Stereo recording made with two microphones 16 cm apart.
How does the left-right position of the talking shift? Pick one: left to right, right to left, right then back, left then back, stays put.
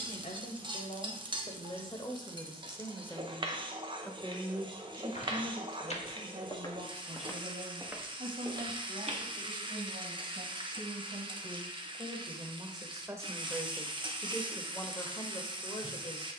right then back.